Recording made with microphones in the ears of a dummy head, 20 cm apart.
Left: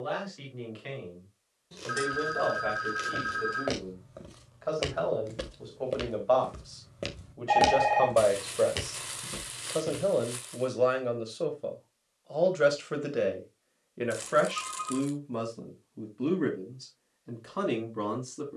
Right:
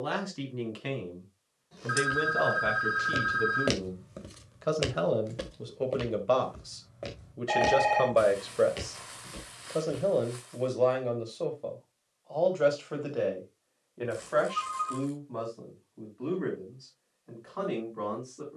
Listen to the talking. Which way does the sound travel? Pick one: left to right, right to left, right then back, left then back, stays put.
right to left.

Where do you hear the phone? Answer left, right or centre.
right.